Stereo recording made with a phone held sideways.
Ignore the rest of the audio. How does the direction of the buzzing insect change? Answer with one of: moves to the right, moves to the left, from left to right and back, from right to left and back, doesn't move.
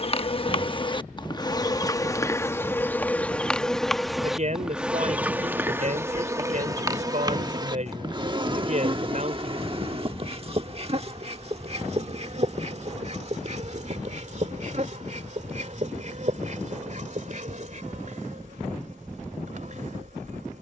moves to the right.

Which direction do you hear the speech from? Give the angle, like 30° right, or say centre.
50° right.